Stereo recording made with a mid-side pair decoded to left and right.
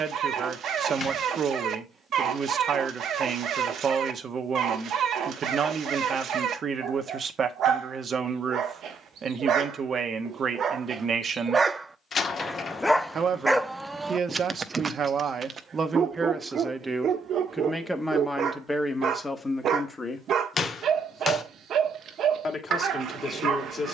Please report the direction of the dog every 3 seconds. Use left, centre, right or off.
right, right, right, right, centre, right, right, right.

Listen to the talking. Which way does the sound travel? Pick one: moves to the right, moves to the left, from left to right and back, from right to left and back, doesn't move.
moves to the left.